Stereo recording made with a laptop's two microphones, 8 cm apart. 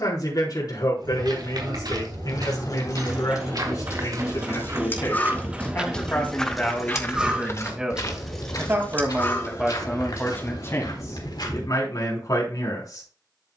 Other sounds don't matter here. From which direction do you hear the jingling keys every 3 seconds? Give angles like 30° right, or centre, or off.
60° left, 40° left, centre, 40° left, off.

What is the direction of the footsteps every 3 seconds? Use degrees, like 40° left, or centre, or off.
70° right, 40° right, 30° left, 70° left, off.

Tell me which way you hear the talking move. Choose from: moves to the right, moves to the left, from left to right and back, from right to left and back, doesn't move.
from left to right and back.